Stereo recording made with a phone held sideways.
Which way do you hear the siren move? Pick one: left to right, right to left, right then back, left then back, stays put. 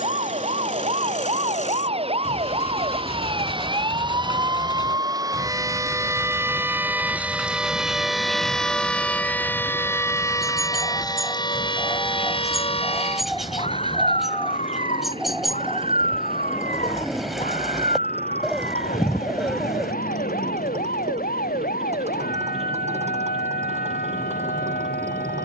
right to left.